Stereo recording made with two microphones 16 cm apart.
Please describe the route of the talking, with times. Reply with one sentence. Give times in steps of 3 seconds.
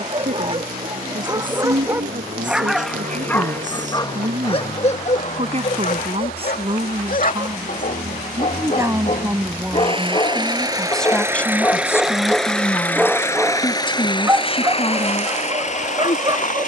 You can hear the talking on the right from 0 s, in the centre from 9 s and on the left from 12 s.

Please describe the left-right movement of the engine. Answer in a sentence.
You can hear the engine go from the right side to the left.